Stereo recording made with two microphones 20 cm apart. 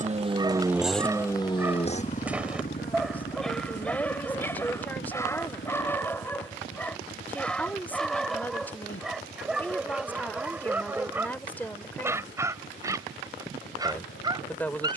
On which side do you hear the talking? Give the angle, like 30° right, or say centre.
10° left.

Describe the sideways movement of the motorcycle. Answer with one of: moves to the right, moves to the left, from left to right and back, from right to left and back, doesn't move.
moves to the left.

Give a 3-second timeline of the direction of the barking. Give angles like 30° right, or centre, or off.
10° right, 10° left, centre, 10° right, 20° right.